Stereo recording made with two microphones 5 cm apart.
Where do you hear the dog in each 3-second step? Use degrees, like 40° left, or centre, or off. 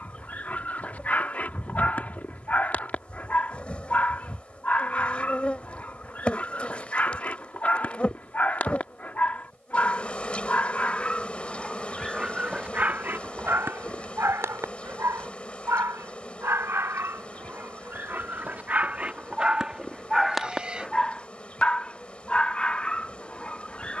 30° left, 30° left, 30° left, 20° left, 40° right, 50° right, 20° right, 20° left.